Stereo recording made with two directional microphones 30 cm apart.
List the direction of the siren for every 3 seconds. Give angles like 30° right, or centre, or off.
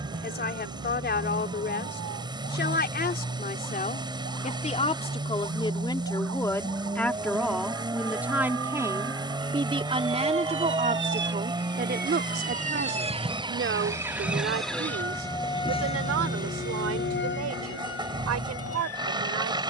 70° right, 60° right, 60° right, 40° right, 10° right, 30° left, 50° left.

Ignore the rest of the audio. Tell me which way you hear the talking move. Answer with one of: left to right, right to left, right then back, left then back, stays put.
left to right.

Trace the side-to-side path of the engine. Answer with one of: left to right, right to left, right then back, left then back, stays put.
stays put.